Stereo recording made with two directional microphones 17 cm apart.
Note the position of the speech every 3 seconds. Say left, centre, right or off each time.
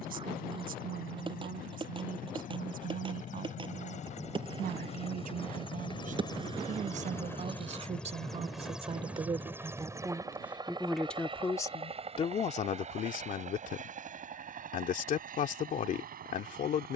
right, right, right, centre, left, left.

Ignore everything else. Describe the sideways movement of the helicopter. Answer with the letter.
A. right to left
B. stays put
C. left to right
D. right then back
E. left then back
C.